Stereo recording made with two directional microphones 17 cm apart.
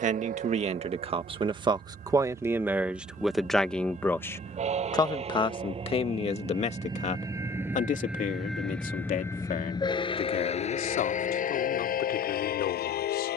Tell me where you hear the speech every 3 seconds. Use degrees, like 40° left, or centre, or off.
30° right, 10° left, 40° left, 60° left, 60° left.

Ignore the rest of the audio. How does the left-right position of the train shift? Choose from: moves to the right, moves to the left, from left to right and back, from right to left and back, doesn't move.
moves to the left.